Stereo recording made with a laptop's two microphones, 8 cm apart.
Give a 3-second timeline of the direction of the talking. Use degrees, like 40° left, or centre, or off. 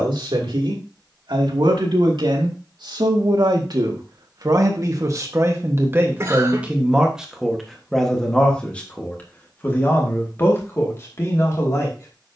70° right, 50° right, centre, 30° left.